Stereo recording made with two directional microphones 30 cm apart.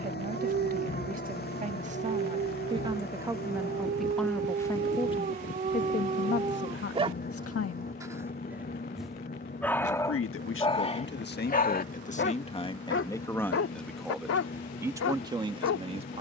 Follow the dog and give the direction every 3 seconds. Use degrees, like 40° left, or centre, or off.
40° right, 30° right, 20° right, 20° left, 50° left, 60° left.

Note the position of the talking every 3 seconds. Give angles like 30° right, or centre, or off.
20° right, centre, 40° left, 40° left, 10° left, 20° right.